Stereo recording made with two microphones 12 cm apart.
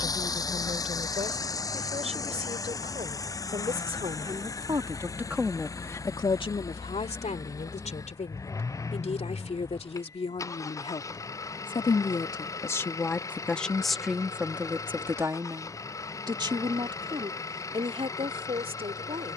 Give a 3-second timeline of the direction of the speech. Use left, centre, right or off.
right, right, left, left, centre, right, right.